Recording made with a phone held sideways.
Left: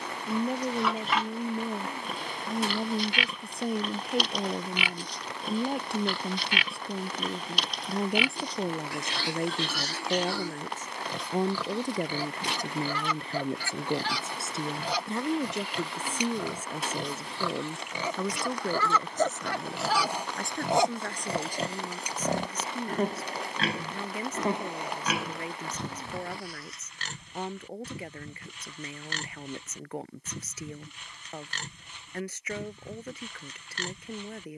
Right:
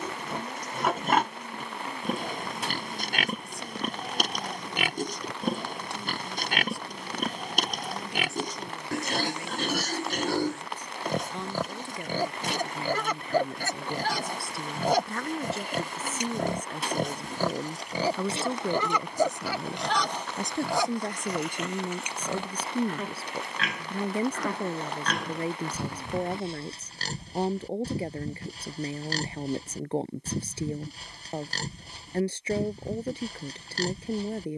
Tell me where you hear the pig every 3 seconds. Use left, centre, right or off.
right, right, right, right, right, right, centre, left, centre, right, right, right.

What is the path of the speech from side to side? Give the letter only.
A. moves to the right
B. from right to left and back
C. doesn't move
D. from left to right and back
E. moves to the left
A.